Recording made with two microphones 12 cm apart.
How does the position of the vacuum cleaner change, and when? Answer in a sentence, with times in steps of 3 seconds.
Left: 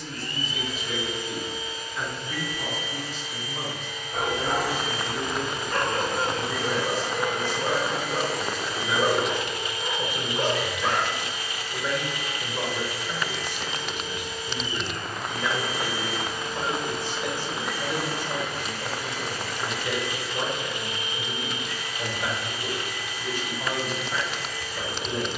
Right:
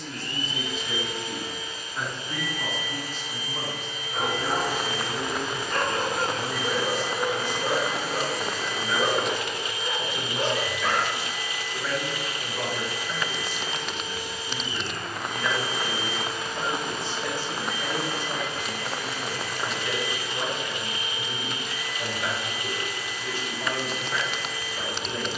You can hear the vacuum cleaner on the right from 0 s, in the centre from 6 s and on the right from 12 s.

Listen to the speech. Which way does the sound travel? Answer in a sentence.
You can hear the speech move to the left.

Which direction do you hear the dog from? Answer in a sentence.
You can hear the dog in the centre.